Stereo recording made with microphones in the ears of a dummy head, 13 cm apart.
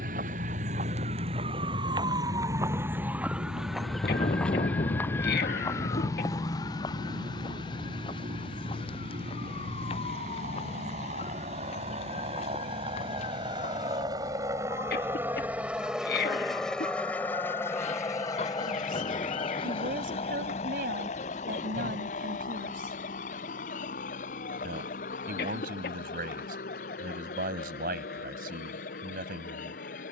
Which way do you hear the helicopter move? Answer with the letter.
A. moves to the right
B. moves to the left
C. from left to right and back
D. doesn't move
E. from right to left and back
B.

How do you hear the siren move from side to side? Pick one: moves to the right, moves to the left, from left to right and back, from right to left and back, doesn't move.
moves to the left.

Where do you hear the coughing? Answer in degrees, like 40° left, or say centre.
70° left.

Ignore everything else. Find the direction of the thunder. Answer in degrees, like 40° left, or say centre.
40° left.